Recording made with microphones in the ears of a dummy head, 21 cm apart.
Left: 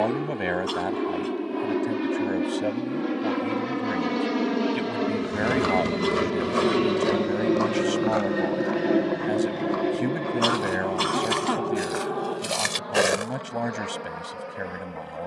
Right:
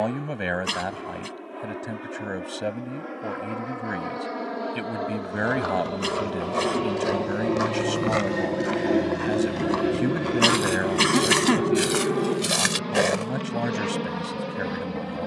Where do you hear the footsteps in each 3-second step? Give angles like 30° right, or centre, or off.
off, 40° left, 10° right, 60° right, 10° right.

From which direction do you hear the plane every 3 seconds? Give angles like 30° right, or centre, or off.
60° left, 50° left, 20° left, 10° right, 40° right.